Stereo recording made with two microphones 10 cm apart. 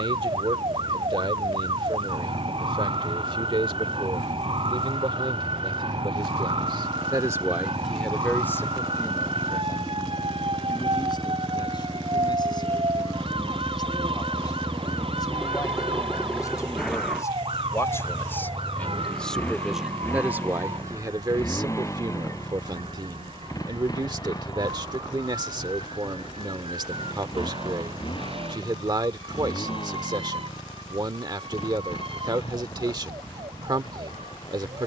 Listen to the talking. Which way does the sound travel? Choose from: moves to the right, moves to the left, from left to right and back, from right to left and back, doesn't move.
from right to left and back.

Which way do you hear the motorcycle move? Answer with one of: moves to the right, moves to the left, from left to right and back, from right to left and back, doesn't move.
moves to the left.